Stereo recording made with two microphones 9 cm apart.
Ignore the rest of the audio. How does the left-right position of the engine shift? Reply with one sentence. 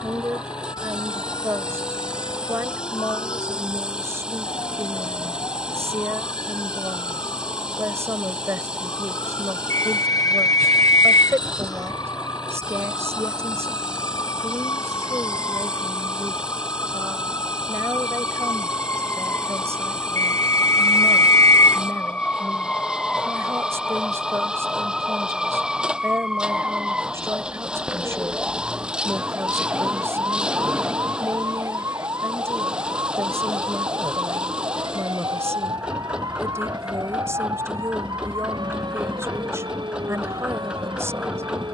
You can hear the engine stay in one place.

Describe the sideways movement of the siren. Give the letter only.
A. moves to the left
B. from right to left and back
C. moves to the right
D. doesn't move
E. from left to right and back
C.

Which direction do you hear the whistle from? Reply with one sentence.
You can hear the whistle on the left.